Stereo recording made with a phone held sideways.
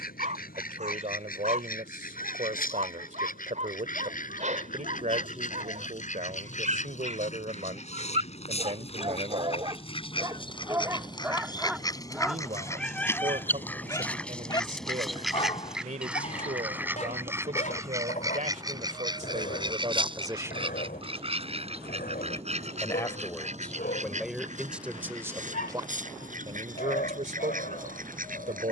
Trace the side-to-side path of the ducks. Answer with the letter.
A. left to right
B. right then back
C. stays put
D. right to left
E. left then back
A.